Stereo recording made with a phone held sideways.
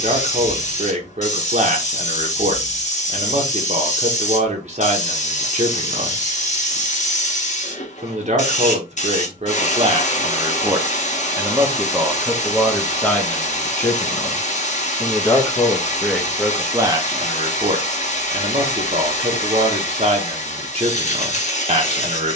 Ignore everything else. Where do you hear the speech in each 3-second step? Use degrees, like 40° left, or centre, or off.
50° right, 50° right, 50° right, 30° right, 10° left, 10° right, 40° right, 40° right.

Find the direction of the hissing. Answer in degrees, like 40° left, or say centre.
50° left.